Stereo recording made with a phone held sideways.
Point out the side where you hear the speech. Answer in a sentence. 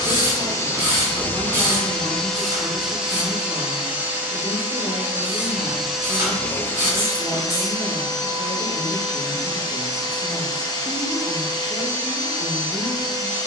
You can hear the speech on the left.